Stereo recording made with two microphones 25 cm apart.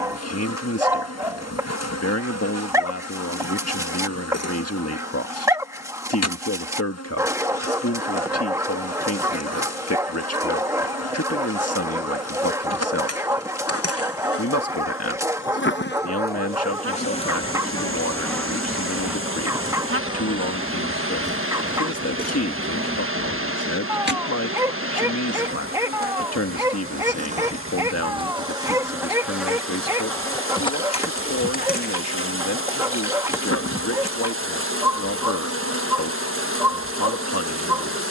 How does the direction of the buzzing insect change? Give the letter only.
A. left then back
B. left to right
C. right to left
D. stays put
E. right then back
E.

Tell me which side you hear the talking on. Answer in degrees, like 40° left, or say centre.
70° left.